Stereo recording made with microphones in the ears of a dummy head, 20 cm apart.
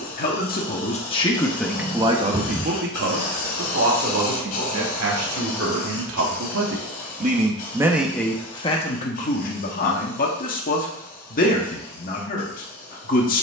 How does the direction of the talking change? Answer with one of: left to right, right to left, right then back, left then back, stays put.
right then back.